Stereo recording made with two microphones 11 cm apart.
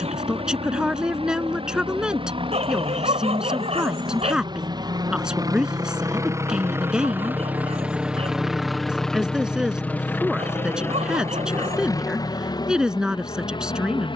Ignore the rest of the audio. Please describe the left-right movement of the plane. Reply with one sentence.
You can hear the plane move from right to left.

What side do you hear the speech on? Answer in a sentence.
You can hear the speech in the centre.